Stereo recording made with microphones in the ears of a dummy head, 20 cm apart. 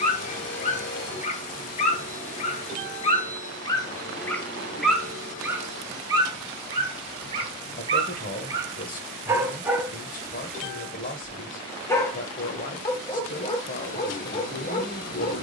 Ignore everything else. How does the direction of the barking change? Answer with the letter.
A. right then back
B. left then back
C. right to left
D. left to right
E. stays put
A.